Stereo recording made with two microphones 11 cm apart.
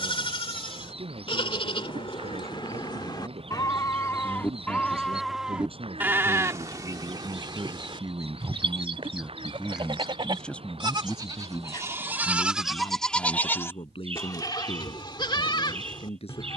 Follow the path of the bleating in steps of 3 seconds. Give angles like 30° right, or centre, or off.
50° left, 20° left, 40° right, 40° right, 10° left, 50° left.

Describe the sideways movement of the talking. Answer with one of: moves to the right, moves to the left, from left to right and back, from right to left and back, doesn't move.
moves to the left.